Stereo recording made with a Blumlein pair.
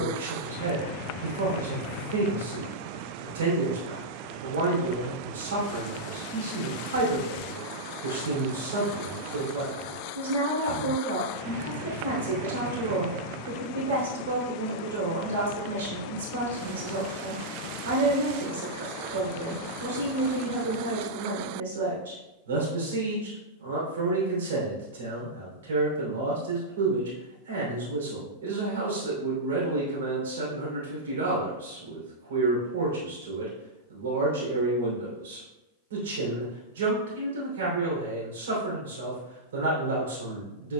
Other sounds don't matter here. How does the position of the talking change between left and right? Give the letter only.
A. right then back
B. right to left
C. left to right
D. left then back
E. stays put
E.